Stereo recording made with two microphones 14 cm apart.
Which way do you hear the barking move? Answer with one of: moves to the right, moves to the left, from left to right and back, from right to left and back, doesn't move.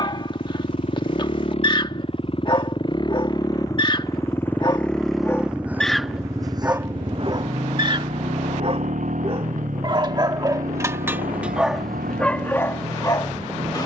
from left to right and back.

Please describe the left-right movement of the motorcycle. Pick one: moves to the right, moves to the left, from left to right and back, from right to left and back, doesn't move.
moves to the right.